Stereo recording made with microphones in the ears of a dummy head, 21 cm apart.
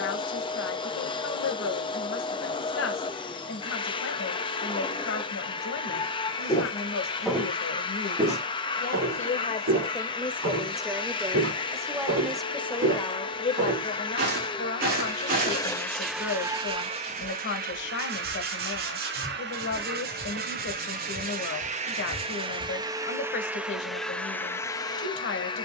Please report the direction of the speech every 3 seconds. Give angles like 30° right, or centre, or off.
60° left, 60° left, 50° left, 10° left, 20° left, 50° left, 50° left, 50° left, 50° left.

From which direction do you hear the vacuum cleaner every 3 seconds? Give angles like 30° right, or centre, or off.
20° left, 20° left, 20° left, 20° left, 20° left, 10° right, 50° right, 20° right, 10° left.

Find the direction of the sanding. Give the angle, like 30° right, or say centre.
40° right.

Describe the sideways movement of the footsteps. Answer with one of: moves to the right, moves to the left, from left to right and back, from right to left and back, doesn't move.
from left to right and back.